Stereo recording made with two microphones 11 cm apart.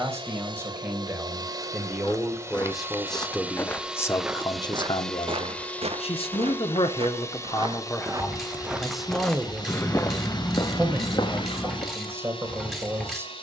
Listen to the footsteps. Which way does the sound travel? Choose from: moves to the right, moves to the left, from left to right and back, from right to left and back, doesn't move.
from left to right and back.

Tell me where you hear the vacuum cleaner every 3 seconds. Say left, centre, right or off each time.
right, centre, left, left, left.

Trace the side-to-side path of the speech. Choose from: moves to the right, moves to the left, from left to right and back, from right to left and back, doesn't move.
from right to left and back.